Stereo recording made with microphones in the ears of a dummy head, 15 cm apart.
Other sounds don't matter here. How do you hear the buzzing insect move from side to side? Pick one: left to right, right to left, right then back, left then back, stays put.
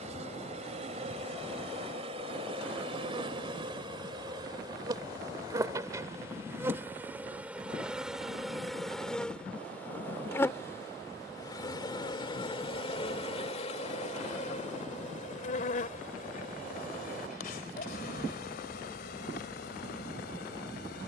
right to left.